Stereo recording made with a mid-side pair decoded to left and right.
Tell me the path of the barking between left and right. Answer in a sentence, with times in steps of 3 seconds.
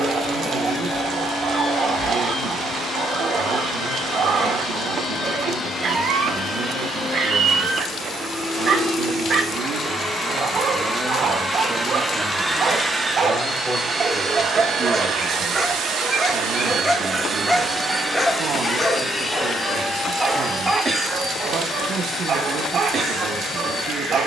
You can hear the barking on the right from 0 s, in the centre from 15 s and on the right from 21 s.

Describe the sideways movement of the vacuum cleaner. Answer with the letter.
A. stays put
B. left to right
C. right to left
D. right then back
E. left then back
D.